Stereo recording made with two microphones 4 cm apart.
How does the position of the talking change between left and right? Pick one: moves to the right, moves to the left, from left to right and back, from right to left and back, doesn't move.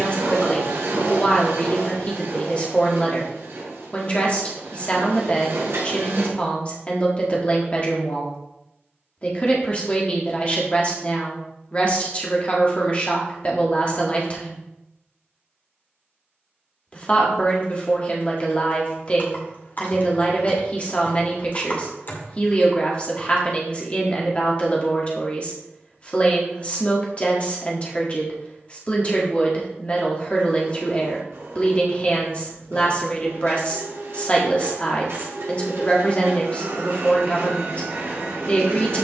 doesn't move.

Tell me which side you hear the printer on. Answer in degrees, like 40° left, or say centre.
80° right.